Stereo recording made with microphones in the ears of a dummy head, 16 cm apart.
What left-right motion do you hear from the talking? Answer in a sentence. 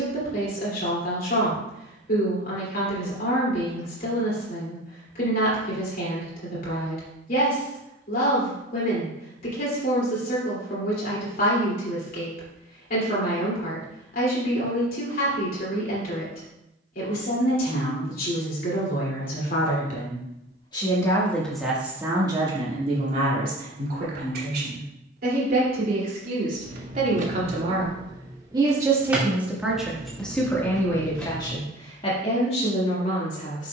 You can hear the talking move from left to right and back again.